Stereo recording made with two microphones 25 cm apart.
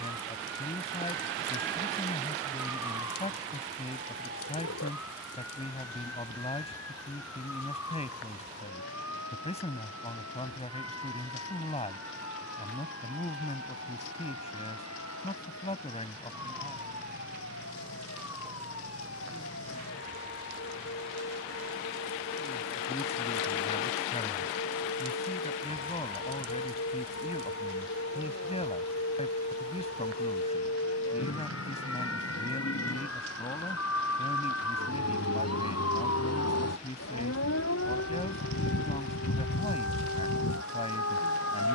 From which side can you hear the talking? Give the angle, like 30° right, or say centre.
30° left.